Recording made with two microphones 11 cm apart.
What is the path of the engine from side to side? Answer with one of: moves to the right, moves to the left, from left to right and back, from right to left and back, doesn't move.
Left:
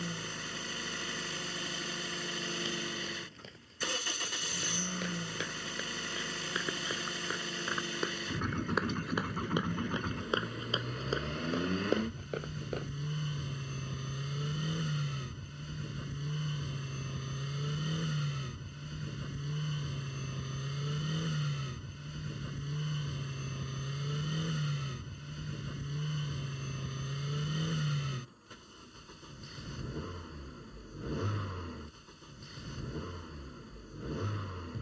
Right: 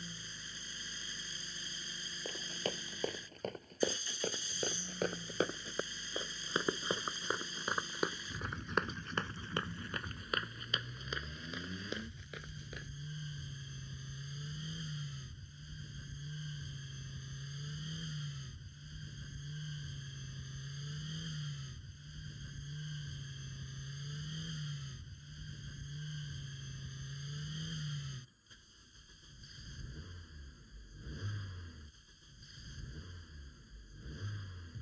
doesn't move.